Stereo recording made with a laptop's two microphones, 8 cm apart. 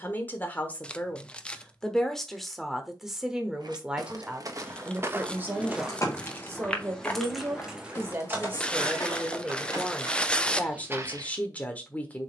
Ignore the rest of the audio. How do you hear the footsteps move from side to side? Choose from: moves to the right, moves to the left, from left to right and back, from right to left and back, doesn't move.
from right to left and back.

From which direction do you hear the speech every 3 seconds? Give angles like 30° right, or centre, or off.
10° left, 20° right, 30° right, 10° left.